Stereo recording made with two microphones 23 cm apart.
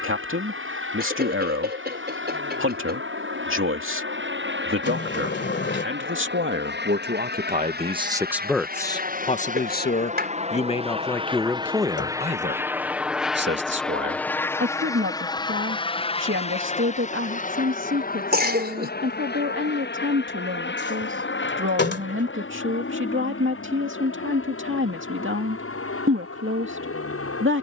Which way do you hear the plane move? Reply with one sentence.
In this clip you hear the plane move to the left.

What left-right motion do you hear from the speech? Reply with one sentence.
In this clip you hear the speech move from right to left and back again.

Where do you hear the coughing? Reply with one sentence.
You can hear the coughing on the right.